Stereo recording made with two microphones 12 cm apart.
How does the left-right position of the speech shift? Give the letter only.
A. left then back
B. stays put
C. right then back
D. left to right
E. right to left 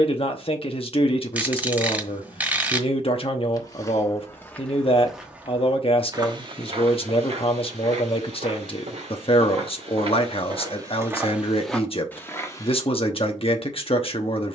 B.